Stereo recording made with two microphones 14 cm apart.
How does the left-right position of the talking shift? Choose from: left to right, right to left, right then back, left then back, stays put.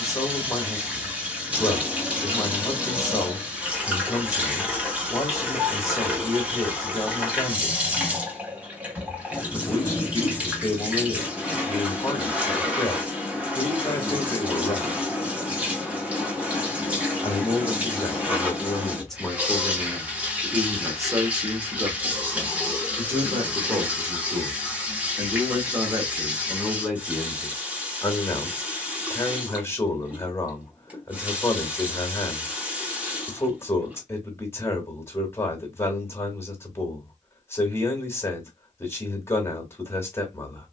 right then back.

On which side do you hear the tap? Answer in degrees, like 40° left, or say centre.
10° right.